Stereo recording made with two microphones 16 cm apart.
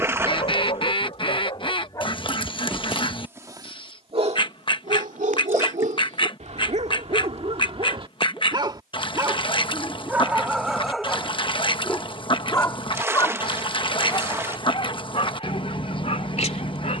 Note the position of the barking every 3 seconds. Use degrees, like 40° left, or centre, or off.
30° left, 40° right, 40° right, centre, 30° left, 40° left.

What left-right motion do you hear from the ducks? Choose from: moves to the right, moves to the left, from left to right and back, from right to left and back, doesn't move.
doesn't move.